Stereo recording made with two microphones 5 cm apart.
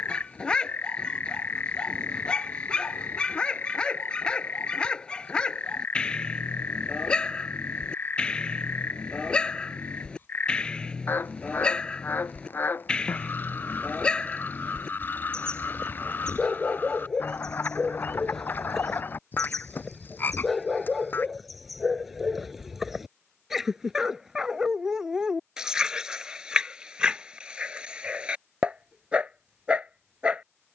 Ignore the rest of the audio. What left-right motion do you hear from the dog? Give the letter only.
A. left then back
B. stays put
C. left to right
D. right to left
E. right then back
C.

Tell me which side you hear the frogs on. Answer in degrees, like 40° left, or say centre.
40° left.